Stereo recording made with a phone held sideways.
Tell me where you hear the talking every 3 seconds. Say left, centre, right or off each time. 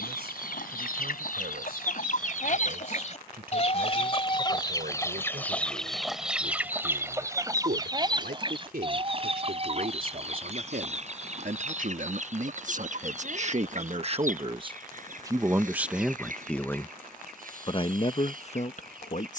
right, right, right, right, right, centre, left.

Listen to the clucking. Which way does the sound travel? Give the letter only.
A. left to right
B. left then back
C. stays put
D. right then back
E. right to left
A.